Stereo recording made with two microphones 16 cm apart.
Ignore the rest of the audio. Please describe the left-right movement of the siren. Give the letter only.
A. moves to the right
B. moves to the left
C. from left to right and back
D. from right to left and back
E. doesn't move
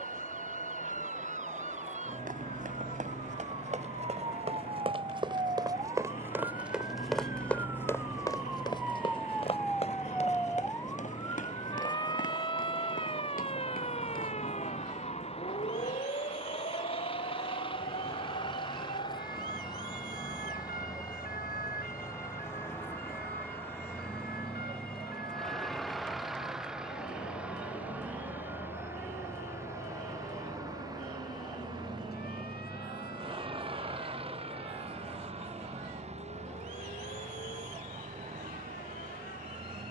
B.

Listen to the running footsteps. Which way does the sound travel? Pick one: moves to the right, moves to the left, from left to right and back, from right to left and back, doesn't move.
moves to the left.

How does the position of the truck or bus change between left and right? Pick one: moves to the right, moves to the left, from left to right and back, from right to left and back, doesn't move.
moves to the right.